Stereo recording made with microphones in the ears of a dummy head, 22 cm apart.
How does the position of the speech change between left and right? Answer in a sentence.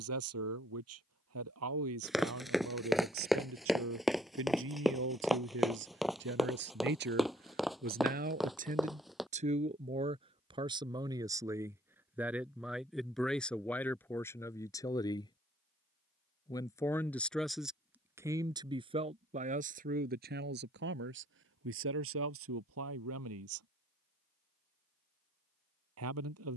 In this clip you hear the speech go left and come back.